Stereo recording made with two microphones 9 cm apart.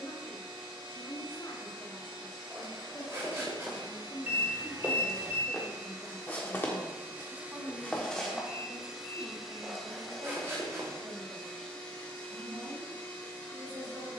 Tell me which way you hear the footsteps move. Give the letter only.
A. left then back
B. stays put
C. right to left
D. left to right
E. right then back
A.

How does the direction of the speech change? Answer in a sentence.
In this clip you hear the speech go from the left side to the right.